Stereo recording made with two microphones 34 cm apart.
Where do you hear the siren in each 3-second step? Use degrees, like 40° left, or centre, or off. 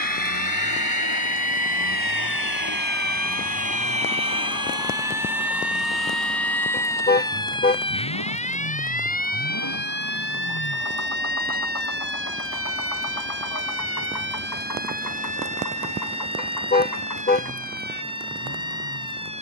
40° right, 10° right, 10° left, 30° left, 40° left, 50° left, 50° left.